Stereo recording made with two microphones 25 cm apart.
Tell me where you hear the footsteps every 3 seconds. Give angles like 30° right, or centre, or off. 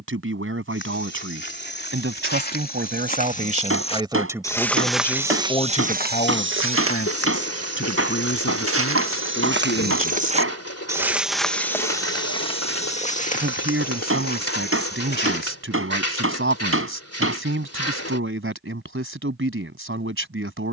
40° left, 10° left, 60° right, 20° right, 30° left, 40° left, off.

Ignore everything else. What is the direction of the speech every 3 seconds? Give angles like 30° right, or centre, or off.
50° right, 10° right, 50° left, 60° left, 50° right, 60° right, 60° right.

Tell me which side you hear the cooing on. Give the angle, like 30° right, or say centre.
70° left.